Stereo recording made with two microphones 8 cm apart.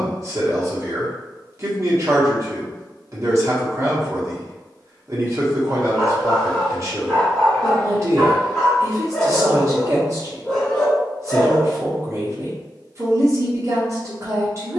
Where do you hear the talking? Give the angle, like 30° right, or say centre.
40° right.